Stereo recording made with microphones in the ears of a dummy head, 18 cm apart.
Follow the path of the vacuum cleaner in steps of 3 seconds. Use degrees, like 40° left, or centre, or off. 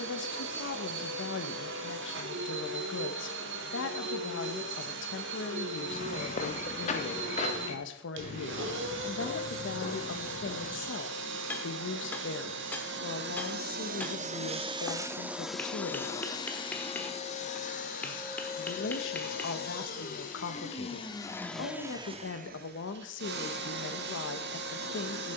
70° right, 70° right, 70° right, 70° right, 50° right, 20° left, 40° left, 30° right, 60° right.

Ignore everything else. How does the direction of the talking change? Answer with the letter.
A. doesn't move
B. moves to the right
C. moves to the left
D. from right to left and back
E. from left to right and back
A.